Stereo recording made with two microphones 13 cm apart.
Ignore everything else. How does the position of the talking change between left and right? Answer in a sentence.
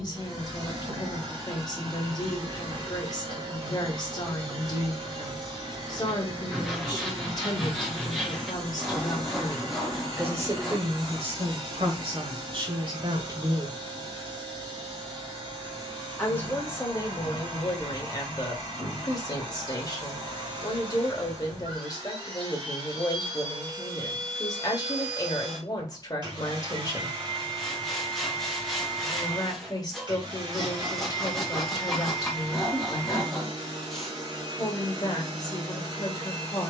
You can hear the talking go right and come back.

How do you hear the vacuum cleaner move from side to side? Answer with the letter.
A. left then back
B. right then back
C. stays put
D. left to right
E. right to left
C.